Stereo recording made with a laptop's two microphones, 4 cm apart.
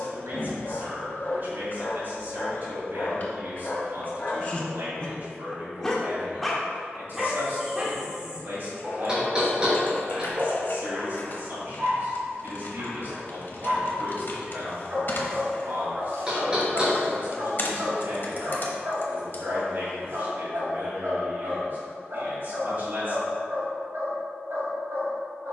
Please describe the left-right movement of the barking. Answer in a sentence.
In this clip you hear the barking go from the left side to the right.